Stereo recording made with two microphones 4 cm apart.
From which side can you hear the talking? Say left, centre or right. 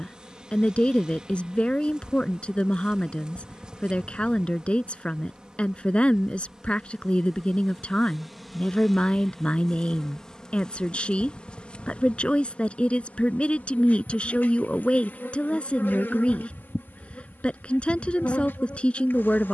left.